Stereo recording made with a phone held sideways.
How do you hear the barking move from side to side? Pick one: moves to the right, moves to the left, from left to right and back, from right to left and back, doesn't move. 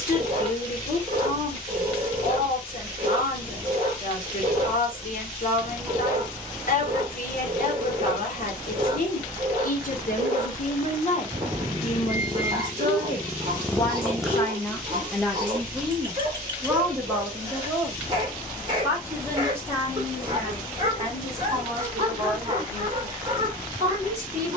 doesn't move.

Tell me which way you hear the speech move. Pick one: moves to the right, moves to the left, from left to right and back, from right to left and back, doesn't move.
moves to the right.